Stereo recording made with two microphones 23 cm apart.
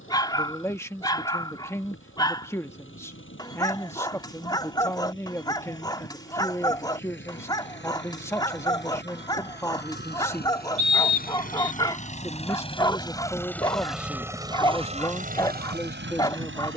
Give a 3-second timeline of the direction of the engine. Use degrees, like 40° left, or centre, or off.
60° left, 60° left, 60° left, 50° left, 10° left, 50° right.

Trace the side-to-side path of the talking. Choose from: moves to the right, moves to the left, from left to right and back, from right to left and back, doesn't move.
doesn't move.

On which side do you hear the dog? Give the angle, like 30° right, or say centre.
20° left.